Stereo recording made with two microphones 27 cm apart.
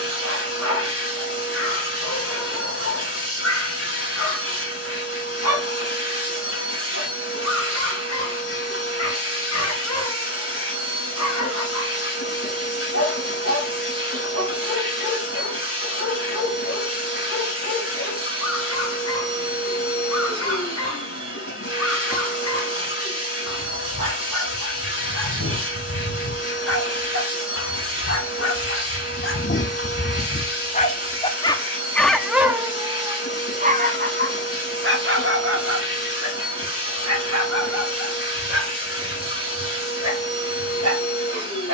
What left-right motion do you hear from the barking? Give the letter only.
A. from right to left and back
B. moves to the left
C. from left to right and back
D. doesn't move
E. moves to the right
E.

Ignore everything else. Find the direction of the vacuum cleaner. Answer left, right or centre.
left.